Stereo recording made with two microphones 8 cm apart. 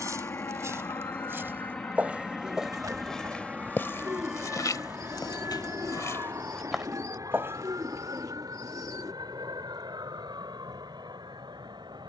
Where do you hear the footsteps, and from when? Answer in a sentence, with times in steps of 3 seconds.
In this clip you hear the footsteps on the right from 0 s, on the left from 3 s, in the centre from 6 s and not at all from 9 s.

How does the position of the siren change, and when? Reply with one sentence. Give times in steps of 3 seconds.
You can hear the siren on the left from 0 s, in the centre from 3 s and on the right from 6 s.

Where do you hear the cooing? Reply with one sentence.
In this clip you hear the cooing on the right.